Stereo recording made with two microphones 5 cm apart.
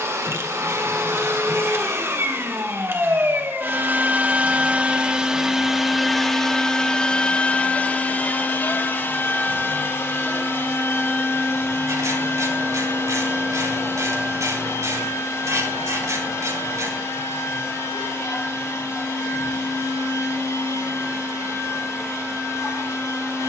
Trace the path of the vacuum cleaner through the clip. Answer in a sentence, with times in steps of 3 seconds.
In this clip you hear the vacuum cleaner on the right from 0 s and on the left from 6 s.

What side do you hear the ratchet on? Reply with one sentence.
In this clip you hear the ratchet on the right.